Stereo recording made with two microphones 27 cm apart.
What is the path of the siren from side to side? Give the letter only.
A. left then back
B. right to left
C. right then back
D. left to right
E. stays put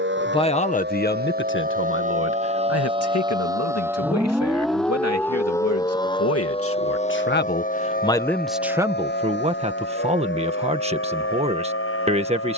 B.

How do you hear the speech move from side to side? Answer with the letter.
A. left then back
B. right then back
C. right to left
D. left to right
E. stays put
A.